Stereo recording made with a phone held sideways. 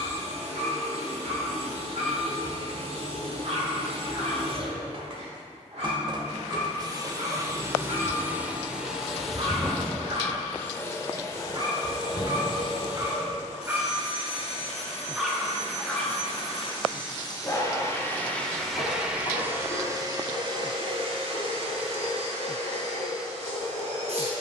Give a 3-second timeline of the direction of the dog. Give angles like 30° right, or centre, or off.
70° right, 70° right, 60° right, 50° right, 20° right, 10° left, 40° left, 60° left.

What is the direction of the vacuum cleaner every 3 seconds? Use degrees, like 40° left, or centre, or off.
60° right, 50° right, 20° right, 10° left, 40° left, 40° left, 20° right, 60° right.